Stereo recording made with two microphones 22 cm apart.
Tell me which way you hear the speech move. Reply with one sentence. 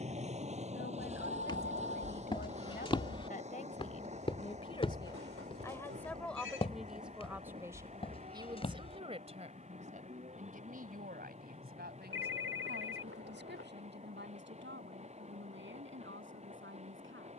You can hear the speech move to the right.